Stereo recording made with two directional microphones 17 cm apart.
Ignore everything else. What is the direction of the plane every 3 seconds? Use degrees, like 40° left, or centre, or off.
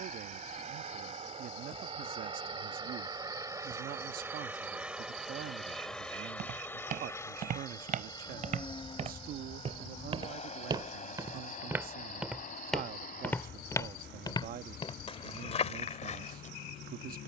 40° right, 10° right, 20° left, 40° left, 50° left, 60° left.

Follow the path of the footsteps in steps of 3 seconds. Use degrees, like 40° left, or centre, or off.
off, off, 50° right, 20° right, 10° left, 40° left.